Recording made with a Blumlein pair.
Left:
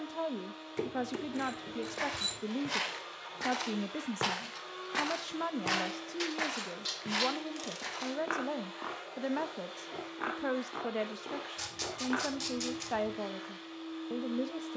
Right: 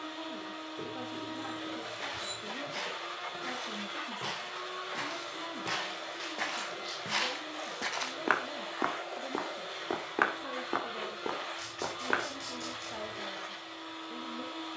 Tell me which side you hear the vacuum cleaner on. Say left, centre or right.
right.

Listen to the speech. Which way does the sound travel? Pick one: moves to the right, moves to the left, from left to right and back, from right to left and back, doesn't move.
doesn't move.